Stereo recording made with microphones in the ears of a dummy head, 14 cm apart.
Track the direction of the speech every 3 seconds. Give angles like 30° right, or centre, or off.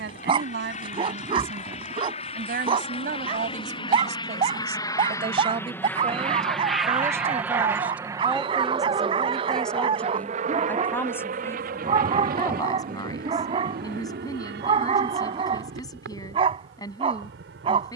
70° right, 40° right, 10° right, 10° left, 20° left, 20° left.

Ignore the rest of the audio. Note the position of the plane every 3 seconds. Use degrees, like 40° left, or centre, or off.
50° left, 30° left, 10° right, 50° right, 60° right, 70° right.